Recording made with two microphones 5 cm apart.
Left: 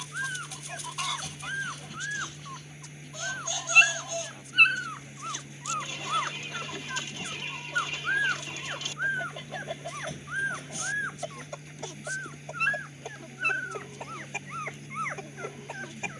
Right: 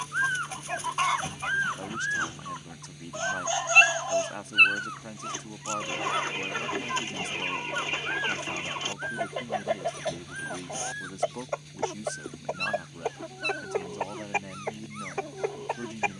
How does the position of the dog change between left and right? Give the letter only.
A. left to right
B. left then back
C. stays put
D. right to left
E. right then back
D.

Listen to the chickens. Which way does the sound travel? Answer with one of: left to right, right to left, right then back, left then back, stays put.
stays put.